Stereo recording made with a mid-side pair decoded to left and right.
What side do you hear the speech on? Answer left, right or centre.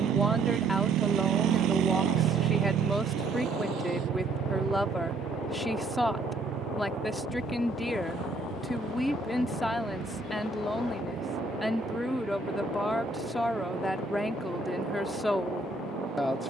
centre.